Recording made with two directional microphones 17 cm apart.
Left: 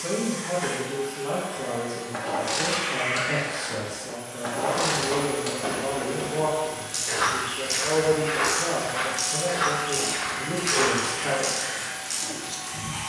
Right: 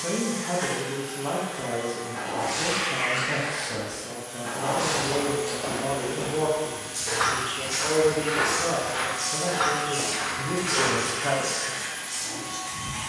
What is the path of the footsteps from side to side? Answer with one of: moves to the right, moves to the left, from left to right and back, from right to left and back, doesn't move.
from left to right and back.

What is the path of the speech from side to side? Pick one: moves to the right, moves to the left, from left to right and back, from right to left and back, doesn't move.
doesn't move.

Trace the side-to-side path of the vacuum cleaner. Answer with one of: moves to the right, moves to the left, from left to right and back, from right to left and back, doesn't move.
moves to the left.